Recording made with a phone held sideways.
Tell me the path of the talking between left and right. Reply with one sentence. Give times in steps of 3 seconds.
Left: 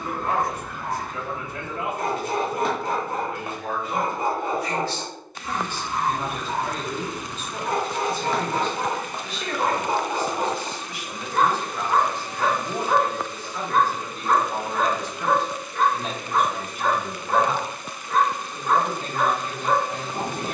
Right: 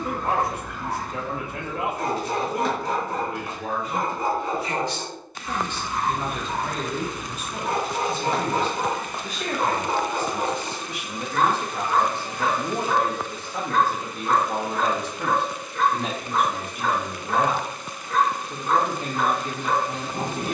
In this clip you hear the talking on the right from 0 s, in the centre from 6 s and on the right from 9 s.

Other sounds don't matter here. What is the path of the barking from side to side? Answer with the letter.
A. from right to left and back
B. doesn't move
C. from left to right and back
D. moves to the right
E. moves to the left
C.